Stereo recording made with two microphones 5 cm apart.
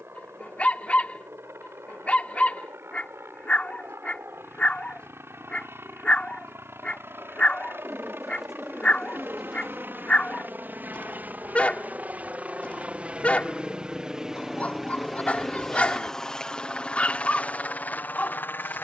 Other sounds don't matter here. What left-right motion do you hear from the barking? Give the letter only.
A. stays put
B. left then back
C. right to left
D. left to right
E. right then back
A.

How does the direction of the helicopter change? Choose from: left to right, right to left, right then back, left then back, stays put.
right to left.